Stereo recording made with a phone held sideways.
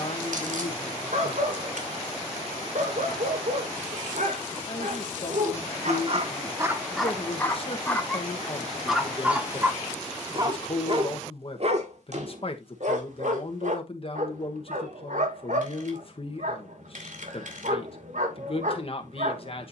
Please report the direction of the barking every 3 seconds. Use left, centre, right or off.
right, right, centre, right, right, right, right.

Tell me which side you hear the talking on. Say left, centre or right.
left.